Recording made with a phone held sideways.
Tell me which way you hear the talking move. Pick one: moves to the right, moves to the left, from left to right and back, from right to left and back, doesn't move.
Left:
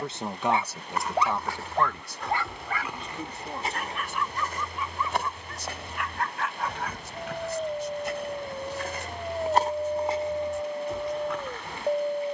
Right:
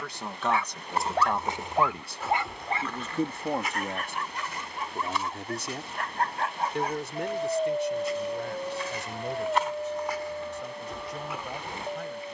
moves to the right.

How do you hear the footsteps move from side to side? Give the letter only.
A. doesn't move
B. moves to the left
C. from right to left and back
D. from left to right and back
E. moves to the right
C.